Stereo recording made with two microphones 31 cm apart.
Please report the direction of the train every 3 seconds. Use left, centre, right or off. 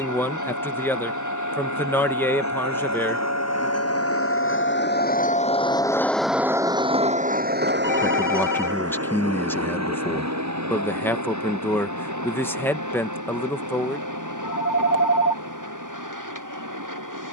left, left, right, right, right, right.